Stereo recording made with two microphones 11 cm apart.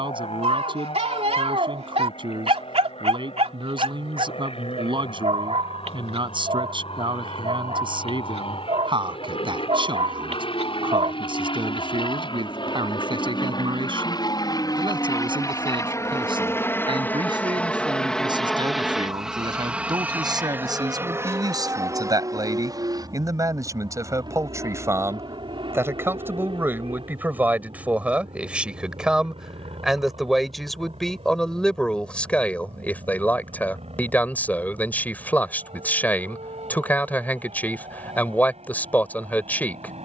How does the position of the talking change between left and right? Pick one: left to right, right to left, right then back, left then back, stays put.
right to left.